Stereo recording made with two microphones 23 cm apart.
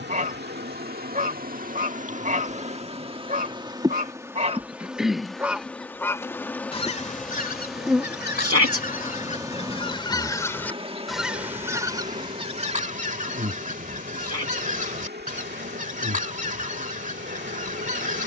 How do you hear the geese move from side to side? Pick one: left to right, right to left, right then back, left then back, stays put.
left then back.